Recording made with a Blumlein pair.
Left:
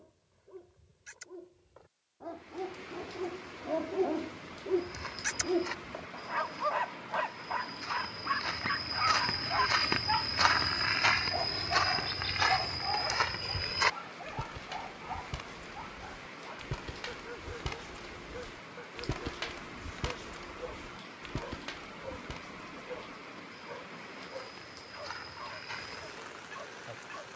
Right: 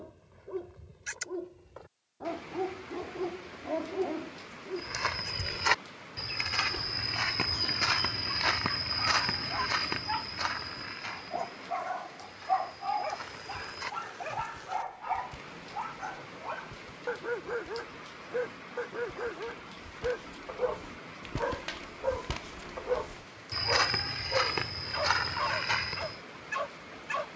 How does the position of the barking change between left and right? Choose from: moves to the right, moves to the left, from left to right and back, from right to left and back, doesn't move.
from right to left and back.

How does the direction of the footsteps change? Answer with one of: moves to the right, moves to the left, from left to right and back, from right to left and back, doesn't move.
from right to left and back.